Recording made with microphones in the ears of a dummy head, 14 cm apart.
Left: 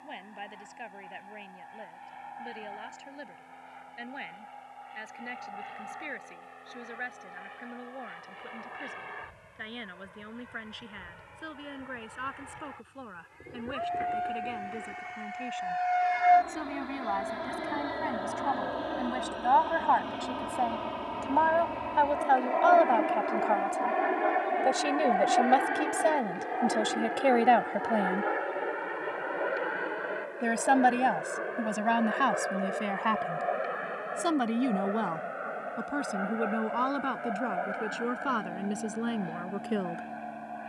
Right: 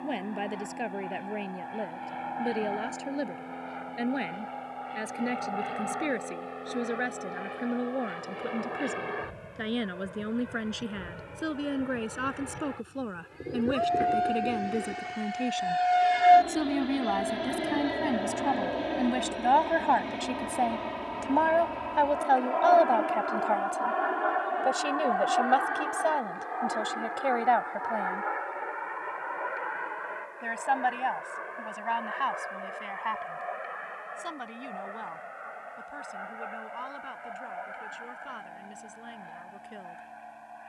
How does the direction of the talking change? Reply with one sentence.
You can hear the talking go from the right side to the left.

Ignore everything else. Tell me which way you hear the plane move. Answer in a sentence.
In this clip you hear the plane travel towards the left.